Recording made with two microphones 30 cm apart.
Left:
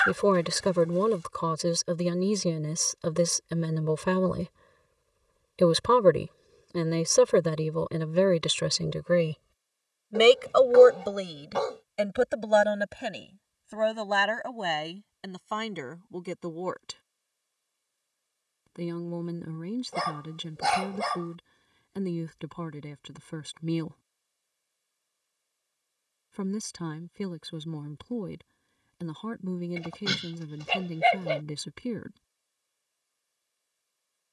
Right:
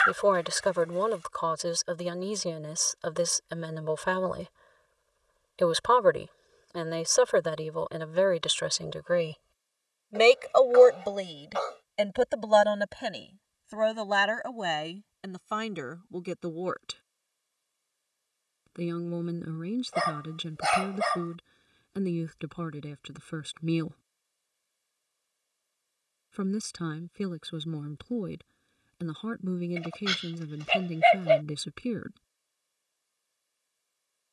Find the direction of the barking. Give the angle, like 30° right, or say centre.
50° left.